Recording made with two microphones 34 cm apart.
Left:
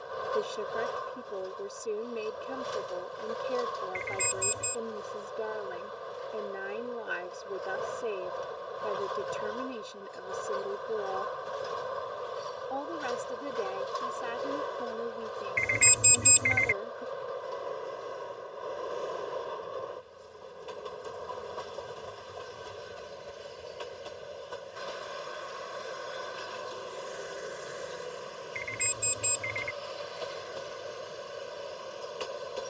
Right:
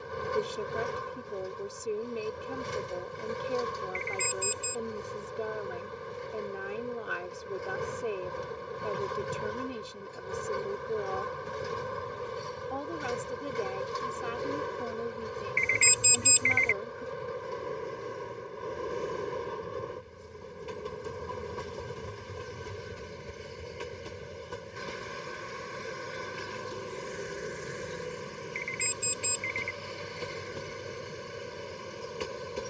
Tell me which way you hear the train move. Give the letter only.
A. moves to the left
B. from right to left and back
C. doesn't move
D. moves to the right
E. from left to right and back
C.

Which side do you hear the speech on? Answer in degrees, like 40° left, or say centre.
centre.